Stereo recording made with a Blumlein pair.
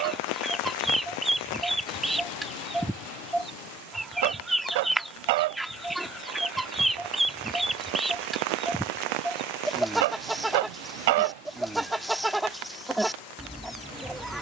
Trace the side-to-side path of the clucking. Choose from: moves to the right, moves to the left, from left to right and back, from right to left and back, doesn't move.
doesn't move.